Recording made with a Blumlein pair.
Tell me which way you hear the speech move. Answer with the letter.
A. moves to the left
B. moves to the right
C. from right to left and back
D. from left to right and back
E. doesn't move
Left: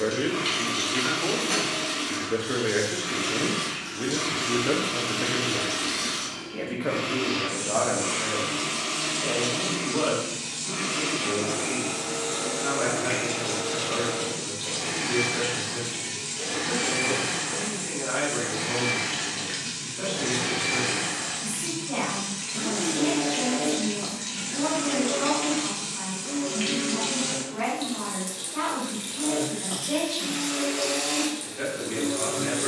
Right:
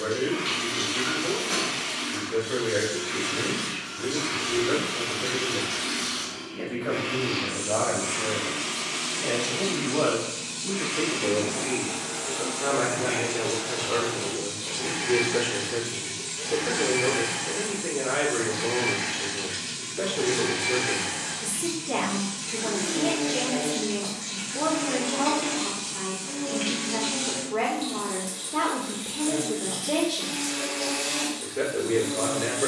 B.